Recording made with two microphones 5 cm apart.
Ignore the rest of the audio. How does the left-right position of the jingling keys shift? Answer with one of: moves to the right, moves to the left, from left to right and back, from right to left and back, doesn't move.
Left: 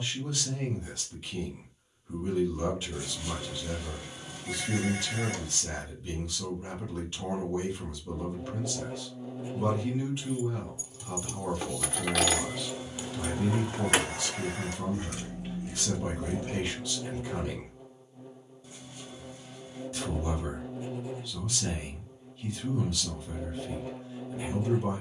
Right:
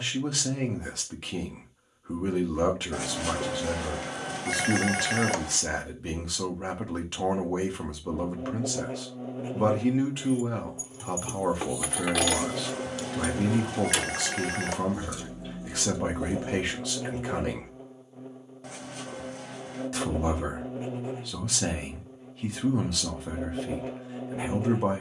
moves to the left.